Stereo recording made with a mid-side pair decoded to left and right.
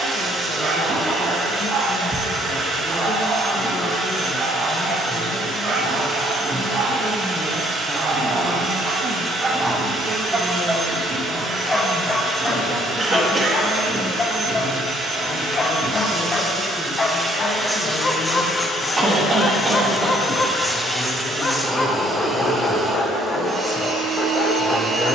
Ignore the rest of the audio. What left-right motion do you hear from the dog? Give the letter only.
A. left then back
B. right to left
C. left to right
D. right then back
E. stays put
B.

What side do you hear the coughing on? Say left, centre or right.
right.